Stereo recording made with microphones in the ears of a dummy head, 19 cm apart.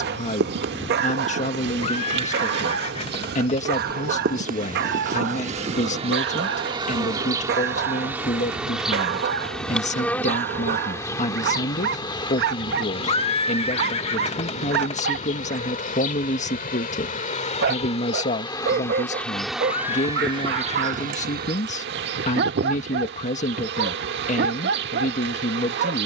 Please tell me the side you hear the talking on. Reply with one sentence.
In this clip you hear the talking on the left.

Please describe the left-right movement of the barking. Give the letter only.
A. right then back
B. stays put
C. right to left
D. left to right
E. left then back
B.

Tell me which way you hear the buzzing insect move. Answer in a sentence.
In this clip you hear the buzzing insect go left and come back.